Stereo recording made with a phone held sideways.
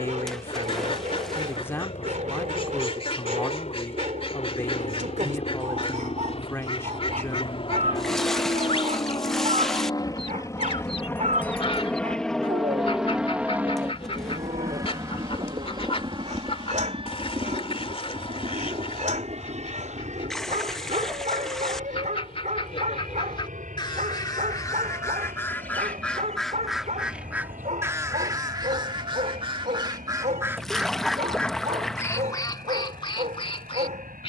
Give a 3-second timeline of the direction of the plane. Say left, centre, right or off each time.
left, left, left, left, centre, right, right, right, right, right, right, right.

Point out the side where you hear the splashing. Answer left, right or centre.
centre.